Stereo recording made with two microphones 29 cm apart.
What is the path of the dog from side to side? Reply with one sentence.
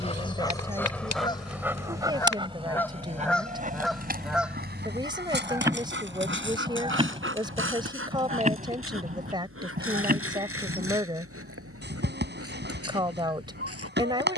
You can hear the dog travel towards the right.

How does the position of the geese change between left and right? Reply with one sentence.
You can hear the geese move to the right.